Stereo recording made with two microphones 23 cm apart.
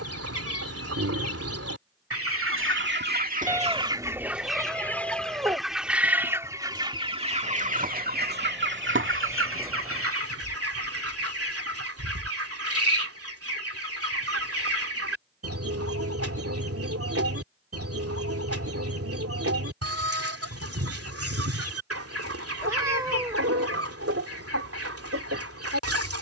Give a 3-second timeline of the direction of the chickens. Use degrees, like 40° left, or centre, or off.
70° right, 10° right, 30° right, 70° right, 70° right, 70° right, 70° right, 70° right, 70° right.